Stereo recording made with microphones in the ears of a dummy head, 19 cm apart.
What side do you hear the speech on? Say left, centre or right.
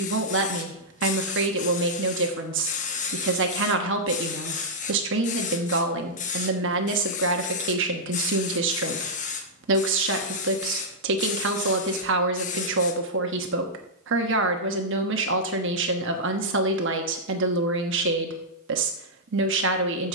right.